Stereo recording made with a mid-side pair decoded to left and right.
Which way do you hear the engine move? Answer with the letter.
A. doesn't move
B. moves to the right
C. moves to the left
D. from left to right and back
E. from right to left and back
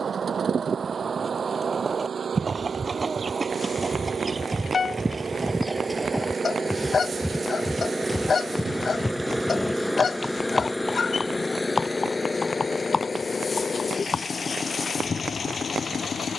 C.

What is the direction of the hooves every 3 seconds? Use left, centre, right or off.
right, right, centre, left, left, off.